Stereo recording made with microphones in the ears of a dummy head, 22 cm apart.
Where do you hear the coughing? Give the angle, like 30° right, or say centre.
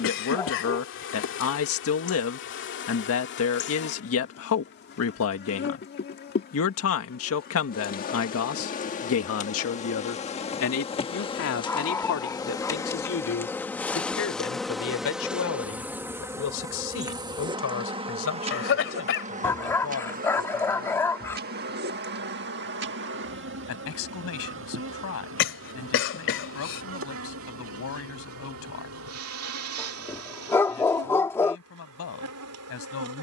50° left.